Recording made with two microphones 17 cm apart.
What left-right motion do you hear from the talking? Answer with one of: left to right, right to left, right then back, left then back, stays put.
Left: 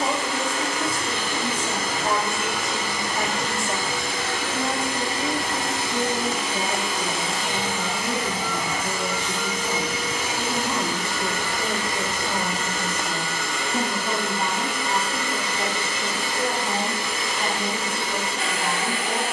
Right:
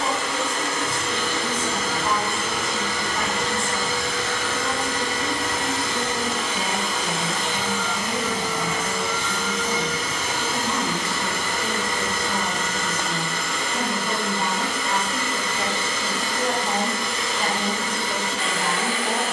left to right.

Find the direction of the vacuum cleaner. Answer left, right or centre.
left.